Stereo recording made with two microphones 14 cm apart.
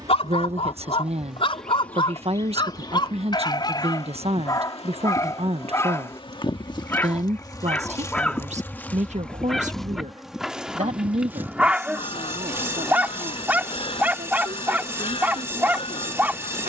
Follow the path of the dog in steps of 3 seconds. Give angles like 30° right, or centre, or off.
40° left, 30° left, 10° left, centre, 10° right, 10° right.